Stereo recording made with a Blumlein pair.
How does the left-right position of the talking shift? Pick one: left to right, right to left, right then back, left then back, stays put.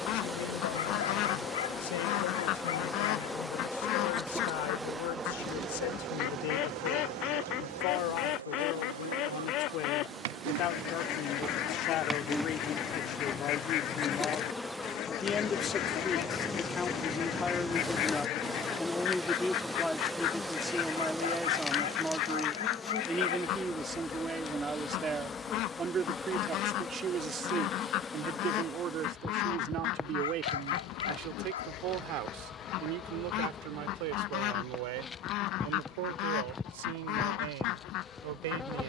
left to right.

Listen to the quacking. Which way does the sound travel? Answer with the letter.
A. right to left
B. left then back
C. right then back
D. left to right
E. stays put
E.